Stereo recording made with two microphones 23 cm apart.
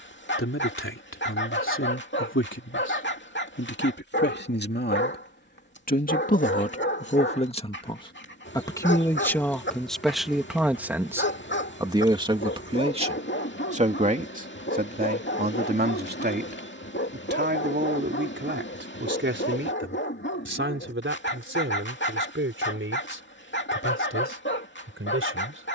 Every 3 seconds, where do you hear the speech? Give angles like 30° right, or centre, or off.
60° left, 50° left, 30° left, centre, 30° right, 50° right, 50° right, 60° right, 60° right.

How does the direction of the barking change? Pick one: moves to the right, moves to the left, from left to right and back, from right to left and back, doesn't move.
doesn't move.